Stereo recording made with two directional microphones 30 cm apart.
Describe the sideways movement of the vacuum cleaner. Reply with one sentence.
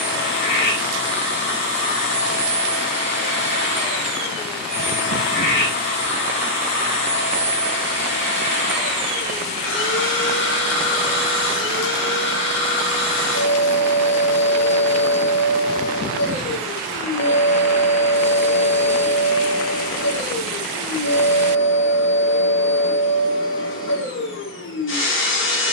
You can hear the vacuum cleaner stay put.